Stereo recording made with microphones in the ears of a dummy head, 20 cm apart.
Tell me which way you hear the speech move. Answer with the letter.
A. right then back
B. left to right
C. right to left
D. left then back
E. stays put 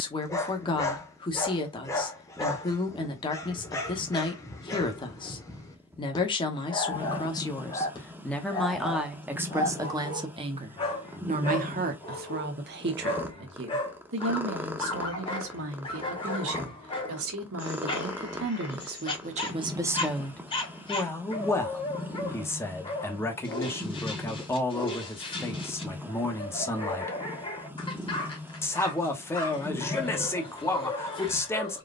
A.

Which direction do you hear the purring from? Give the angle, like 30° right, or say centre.
10° right.